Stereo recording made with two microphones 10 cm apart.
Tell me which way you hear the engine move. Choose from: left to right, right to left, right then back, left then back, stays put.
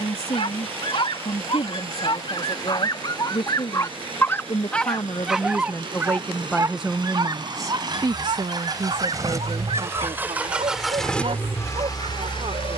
right to left.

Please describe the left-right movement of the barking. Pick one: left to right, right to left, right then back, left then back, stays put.
left to right.